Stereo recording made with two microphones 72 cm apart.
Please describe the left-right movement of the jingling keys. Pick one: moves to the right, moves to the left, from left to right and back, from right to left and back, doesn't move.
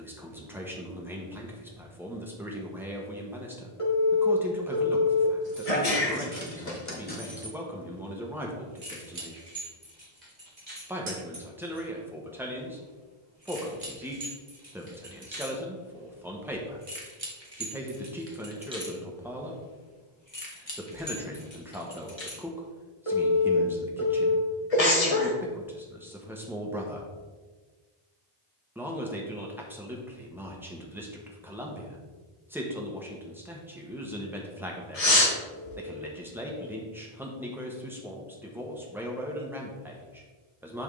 from left to right and back.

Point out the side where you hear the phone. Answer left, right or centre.
left.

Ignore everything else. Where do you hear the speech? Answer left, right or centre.
centre.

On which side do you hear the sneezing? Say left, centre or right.
left.